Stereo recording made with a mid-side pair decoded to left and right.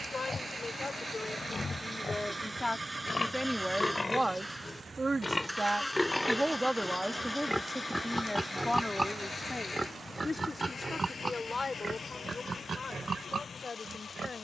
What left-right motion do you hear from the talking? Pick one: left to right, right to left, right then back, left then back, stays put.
right then back.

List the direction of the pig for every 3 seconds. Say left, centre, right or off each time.
left, left, centre, right, right.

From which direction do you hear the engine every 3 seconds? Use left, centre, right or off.
right, centre, left, left, left.